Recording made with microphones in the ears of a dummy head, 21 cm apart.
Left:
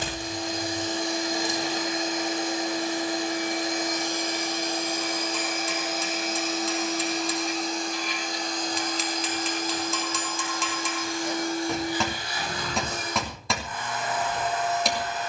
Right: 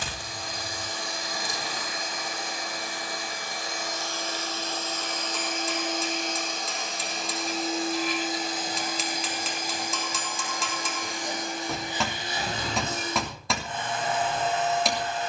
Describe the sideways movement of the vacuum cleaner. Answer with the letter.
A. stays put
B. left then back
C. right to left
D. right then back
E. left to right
E.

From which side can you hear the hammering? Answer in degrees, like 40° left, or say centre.
centre.